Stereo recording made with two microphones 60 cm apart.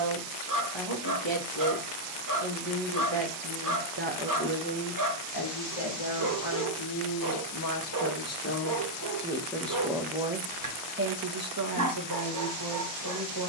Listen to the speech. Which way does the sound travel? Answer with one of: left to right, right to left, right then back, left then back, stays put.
left then back.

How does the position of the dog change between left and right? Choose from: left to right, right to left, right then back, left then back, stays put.
stays put.